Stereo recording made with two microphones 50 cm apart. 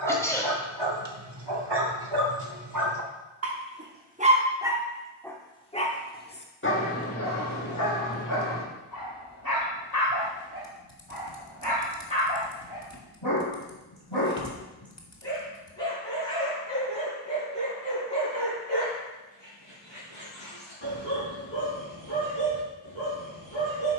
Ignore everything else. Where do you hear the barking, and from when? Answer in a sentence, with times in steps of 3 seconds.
In this clip you hear the barking on the right from 0 s, in the centre from 3 s and on the left from 6 s.